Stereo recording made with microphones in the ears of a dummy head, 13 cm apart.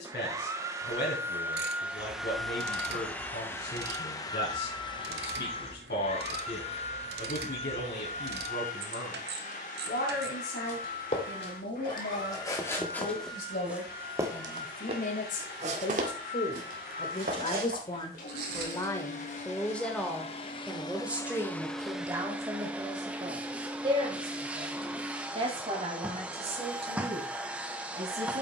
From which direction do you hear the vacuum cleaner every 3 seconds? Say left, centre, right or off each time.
centre, left, left, left, left, left, left, centre, centre, centre.